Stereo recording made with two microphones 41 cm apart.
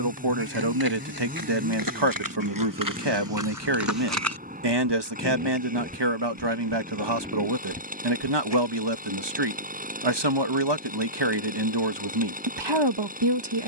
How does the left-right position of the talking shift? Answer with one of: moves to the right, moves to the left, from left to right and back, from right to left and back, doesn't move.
doesn't move.